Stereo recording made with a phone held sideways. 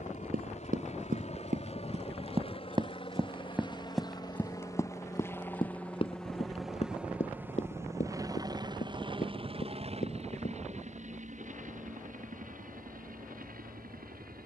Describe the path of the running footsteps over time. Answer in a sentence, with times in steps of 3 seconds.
In this clip you hear the running footsteps on the right from 0 s, in the centre from 3 s, on the left from 6 s and not at all from 12 s.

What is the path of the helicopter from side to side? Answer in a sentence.
In this clip you hear the helicopter travel towards the right.